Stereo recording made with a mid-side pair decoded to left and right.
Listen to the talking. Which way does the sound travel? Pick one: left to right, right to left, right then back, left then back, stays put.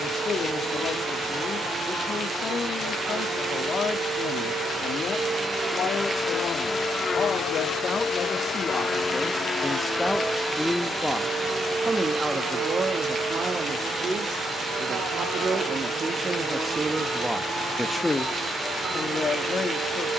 right then back.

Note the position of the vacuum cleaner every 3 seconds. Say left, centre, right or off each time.
right, right, left, centre, right, right, right.